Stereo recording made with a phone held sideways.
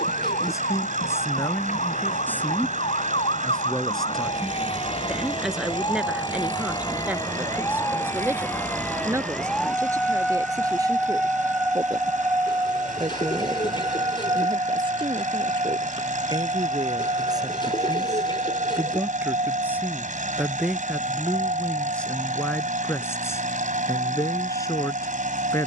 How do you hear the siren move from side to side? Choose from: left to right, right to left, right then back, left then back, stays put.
left to right.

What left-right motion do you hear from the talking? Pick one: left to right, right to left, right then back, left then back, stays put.
right then back.